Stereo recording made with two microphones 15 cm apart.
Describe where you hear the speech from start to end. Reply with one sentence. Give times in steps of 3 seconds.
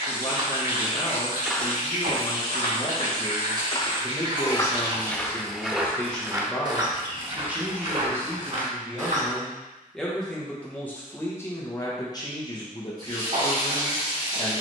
You can hear the speech on the left from 0 s, in the centre from 6 s and on the left from 12 s.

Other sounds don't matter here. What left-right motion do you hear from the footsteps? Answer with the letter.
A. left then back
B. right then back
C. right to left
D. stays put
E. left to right
A.